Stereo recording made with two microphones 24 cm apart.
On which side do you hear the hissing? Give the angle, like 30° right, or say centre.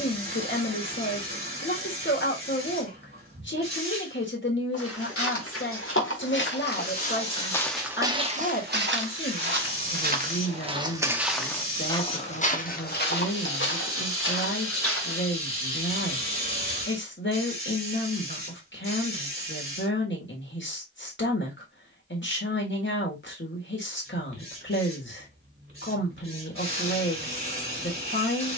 40° right.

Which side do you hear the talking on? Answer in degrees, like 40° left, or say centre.
50° left.